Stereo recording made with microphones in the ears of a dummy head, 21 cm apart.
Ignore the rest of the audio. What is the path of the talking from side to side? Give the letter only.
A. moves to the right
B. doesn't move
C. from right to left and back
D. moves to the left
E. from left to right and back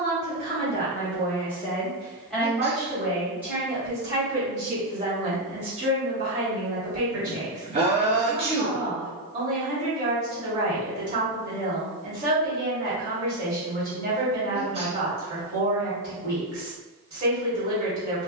A.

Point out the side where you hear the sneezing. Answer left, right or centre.
right.